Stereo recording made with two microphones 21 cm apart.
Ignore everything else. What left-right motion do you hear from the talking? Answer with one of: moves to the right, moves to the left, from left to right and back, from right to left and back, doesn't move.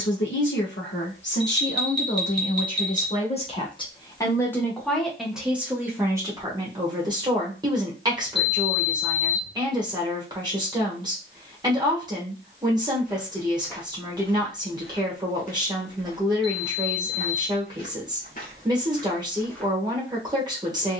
moves to the right.